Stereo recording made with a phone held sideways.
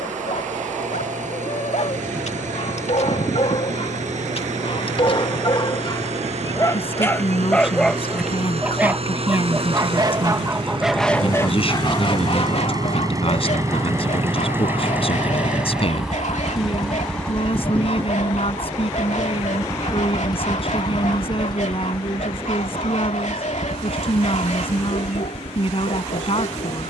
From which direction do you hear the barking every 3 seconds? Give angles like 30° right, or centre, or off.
60° left, 40° left, 10° left, 10° right, 60° left, 60° left, 60° left, 60° left, 60° left.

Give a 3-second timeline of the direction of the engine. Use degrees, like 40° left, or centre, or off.
70° right, 60° right, 50° right, 40° right, 20° right, centre, 20° left, 40° left, 50° left.